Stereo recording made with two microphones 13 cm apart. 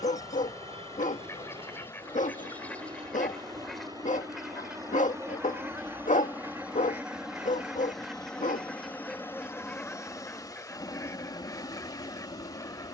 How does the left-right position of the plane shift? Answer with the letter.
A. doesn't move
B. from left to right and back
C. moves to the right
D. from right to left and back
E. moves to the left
E.